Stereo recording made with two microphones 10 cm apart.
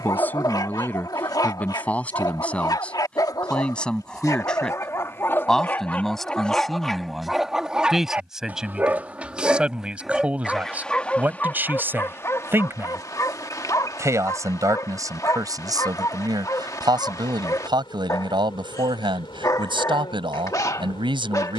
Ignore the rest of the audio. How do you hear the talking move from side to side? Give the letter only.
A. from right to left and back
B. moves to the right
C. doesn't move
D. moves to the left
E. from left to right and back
B.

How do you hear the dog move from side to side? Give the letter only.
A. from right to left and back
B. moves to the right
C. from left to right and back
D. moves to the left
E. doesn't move
C.